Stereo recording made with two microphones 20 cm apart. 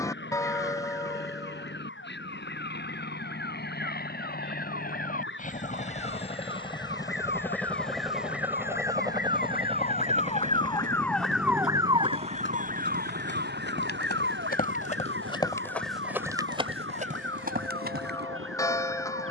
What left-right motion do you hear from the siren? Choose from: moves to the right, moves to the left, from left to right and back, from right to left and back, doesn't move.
moves to the right.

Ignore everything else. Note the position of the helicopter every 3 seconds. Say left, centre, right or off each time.
left, left, centre, right, right, right, right.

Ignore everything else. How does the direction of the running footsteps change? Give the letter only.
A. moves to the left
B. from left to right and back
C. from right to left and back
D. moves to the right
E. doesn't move
D.